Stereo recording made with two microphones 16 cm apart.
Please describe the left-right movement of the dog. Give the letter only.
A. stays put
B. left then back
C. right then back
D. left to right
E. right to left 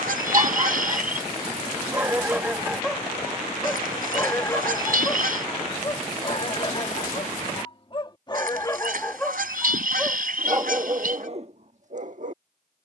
B.